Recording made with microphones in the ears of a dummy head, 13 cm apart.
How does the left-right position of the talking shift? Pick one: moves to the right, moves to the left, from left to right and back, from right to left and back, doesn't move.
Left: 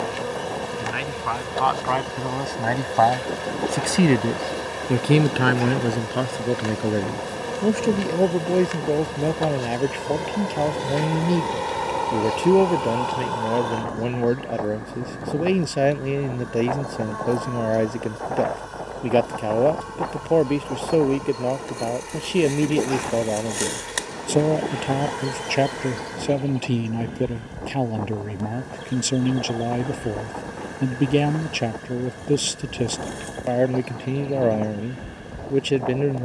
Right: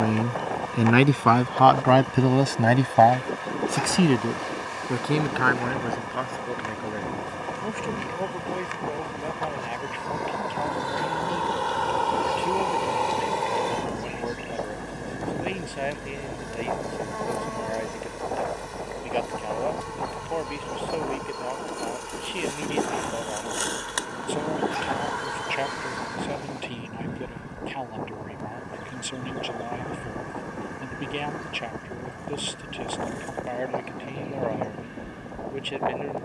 moves to the left.